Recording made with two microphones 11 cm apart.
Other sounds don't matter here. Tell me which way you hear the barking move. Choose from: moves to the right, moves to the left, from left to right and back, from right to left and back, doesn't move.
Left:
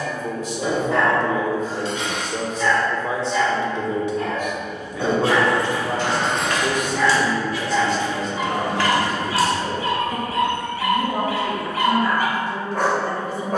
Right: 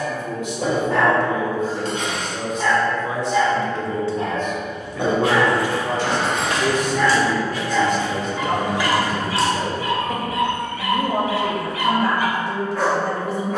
moves to the left.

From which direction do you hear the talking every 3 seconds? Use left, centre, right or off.
left, centre, right, right, right.